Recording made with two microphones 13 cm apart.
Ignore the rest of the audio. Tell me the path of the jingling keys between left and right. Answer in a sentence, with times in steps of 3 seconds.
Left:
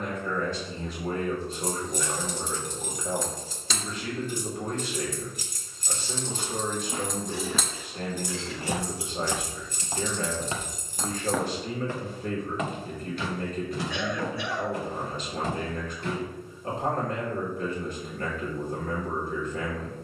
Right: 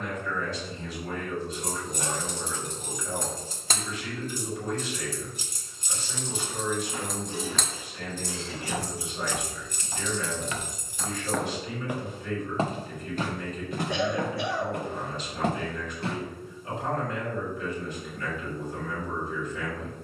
You can hear the jingling keys on the right from 0 s, in the centre from 6 s, on the left from 9 s and not at all from 12 s.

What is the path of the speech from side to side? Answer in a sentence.
In this clip you hear the speech stay in one place.